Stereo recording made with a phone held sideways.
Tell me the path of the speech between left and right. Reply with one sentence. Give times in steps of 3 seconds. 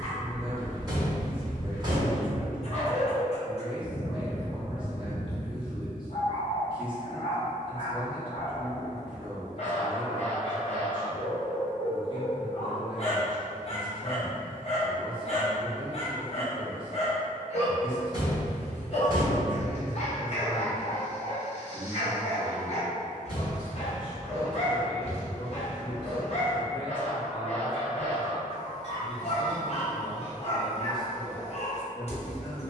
In this clip you hear the speech on the right from 0 s, in the centre from 21 s and on the left from 24 s.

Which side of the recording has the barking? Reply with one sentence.
In this clip you hear the barking on the left.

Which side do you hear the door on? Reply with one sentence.
You can hear the door on the right.